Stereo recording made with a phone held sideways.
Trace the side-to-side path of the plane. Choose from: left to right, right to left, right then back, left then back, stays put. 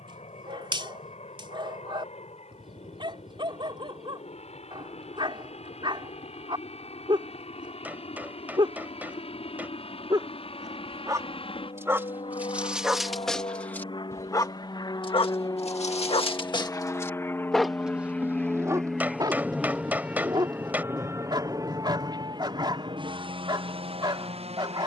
left to right.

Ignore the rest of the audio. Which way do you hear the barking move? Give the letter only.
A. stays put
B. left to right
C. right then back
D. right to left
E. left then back
E.